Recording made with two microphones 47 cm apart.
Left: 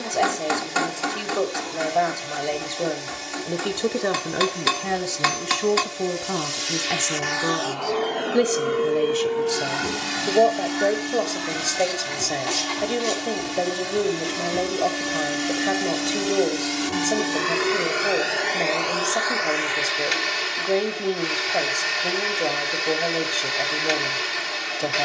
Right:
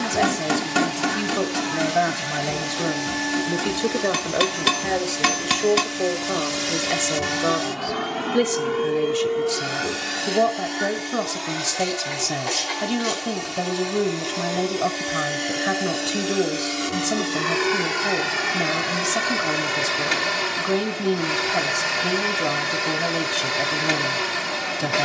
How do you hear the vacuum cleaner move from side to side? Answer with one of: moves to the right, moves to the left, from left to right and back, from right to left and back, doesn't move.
from right to left and back.